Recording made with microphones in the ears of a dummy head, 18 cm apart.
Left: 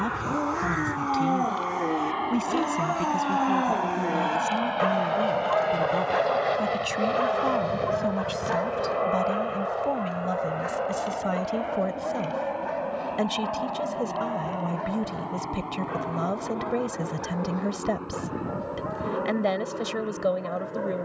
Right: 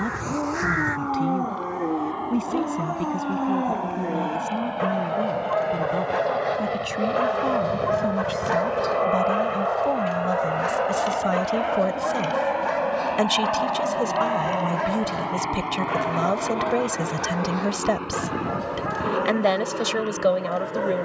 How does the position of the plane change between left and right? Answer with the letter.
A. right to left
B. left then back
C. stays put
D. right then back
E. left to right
E.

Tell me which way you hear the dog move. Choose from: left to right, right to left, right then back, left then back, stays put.
left to right.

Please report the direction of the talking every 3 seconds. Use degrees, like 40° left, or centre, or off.
20° left, 20° left, 10° left, 10° right, 30° right, 30° right, 30° right.